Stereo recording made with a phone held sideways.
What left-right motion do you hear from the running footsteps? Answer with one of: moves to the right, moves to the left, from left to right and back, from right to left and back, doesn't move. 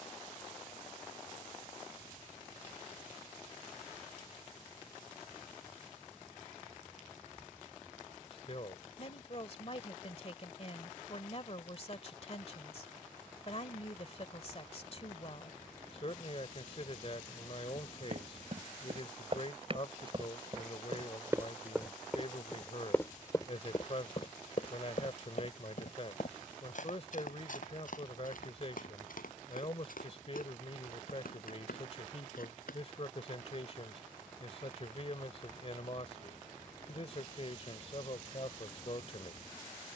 moves to the left.